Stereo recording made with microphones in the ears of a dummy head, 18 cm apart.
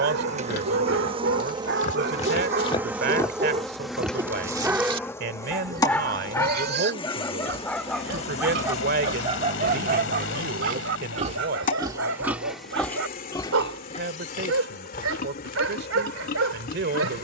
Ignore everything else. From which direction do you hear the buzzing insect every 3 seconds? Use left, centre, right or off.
right, centre, left, left, left, left.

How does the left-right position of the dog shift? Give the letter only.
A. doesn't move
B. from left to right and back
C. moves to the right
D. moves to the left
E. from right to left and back
E.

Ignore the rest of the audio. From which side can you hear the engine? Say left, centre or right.
left.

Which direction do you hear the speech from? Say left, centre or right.
right.